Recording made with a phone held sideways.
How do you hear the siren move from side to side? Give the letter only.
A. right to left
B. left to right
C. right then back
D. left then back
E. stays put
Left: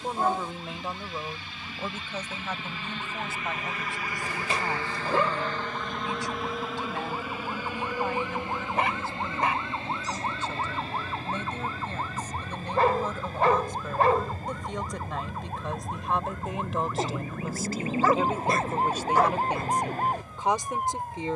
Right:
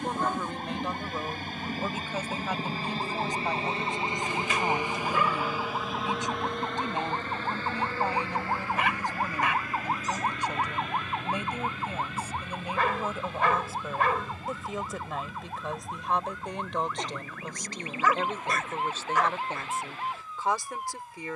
A.